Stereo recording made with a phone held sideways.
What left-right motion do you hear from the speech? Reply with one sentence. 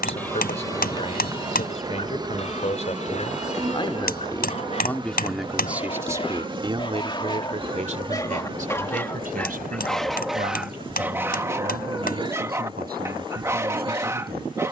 In this clip you hear the speech move from left to right.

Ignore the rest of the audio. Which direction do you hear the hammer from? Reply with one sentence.
In this clip you hear the hammer on the left.